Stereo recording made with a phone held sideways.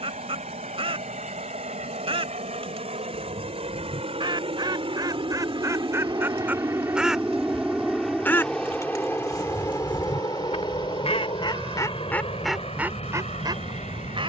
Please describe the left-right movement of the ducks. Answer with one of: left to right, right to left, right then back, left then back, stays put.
left then back.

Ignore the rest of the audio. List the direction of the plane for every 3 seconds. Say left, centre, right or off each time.
right, right, centre, left, left.